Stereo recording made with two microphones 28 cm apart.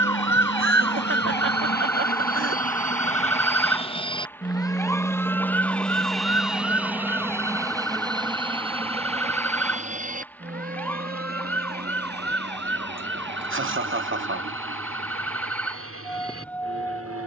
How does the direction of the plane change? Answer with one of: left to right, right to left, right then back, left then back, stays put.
left to right.